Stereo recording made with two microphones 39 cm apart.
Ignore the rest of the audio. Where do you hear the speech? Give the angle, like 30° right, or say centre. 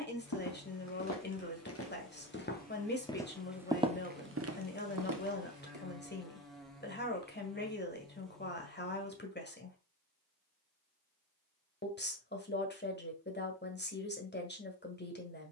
30° left.